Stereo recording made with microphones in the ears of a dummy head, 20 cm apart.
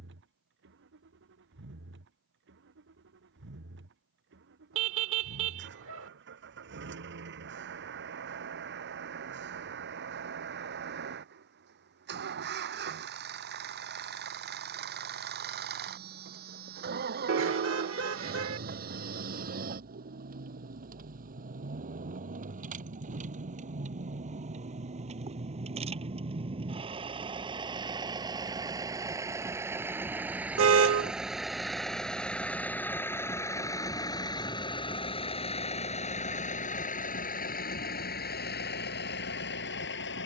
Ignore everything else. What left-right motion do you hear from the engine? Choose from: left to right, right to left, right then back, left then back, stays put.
right to left.